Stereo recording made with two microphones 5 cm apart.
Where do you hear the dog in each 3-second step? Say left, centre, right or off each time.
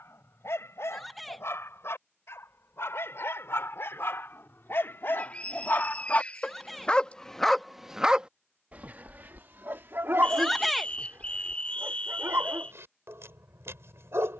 left, left, centre, right, right.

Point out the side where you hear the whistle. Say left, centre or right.
left.